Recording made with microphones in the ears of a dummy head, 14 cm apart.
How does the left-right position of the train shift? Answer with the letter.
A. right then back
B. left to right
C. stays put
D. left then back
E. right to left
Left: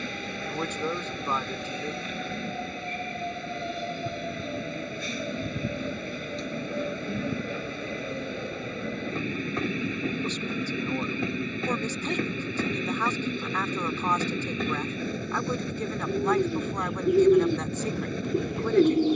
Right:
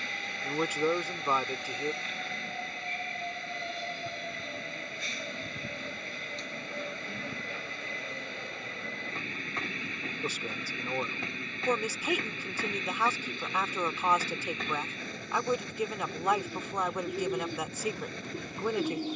C.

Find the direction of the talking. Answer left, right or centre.
centre.